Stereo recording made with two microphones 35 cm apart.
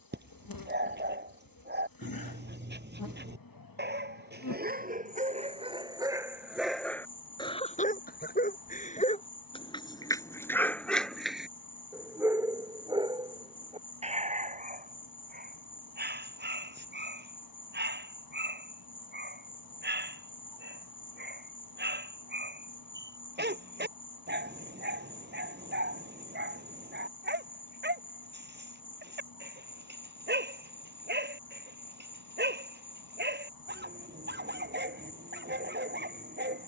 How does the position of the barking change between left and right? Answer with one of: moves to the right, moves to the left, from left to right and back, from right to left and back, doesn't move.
from right to left and back.